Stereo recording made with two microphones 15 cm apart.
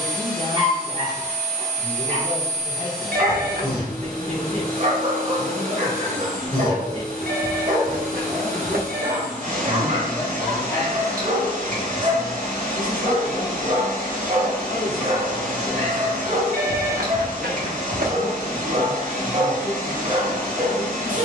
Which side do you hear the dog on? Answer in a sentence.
In this clip you hear the dog on the right.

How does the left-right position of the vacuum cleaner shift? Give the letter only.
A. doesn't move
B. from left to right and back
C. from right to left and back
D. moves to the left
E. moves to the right
A.